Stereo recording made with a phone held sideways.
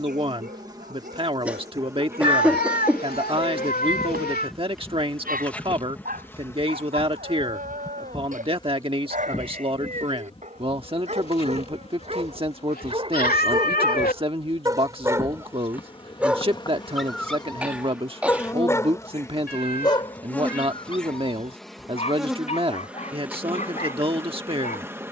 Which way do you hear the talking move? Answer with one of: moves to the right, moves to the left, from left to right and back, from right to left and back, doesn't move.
doesn't move.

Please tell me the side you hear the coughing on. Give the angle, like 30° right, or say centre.
10° right.